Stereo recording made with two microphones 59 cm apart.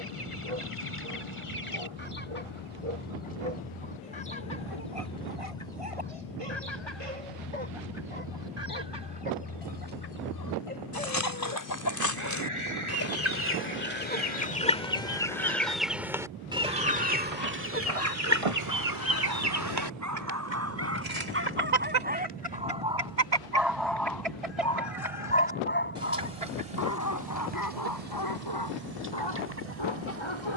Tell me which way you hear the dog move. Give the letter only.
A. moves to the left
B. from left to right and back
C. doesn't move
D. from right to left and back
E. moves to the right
A.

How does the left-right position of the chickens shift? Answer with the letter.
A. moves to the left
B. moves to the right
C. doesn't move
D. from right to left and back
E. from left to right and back
B.